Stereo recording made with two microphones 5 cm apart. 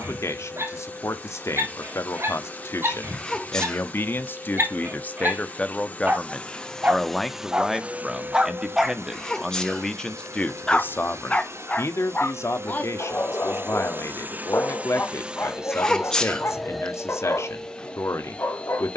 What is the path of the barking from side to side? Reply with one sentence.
You can hear the barking go from the right side to the left.